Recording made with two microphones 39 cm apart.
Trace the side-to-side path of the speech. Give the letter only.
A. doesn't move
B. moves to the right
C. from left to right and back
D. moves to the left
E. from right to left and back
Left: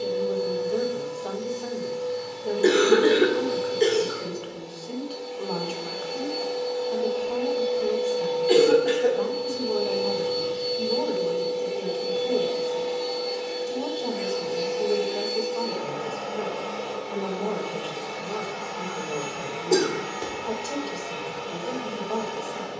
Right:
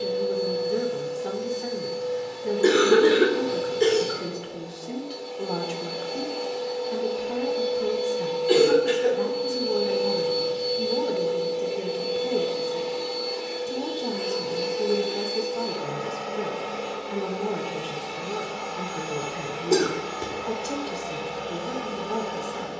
A.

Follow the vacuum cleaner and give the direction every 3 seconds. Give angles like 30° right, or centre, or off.
70° right, 60° right, 30° right, centre, 10° right, 40° right, 50° right, 60° right.